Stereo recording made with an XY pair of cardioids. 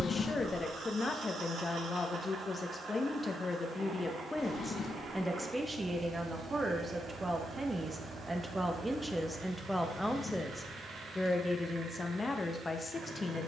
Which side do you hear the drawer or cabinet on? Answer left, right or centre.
left.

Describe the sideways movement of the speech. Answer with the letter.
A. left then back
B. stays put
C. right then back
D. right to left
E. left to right
C.